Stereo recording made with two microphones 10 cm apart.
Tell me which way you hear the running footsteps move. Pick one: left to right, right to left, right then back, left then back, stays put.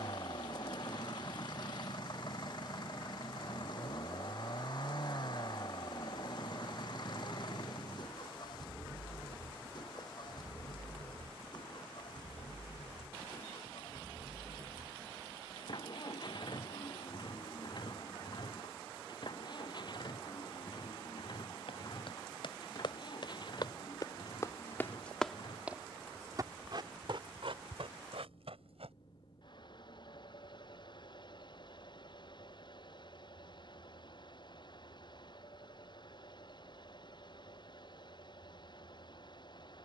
left to right.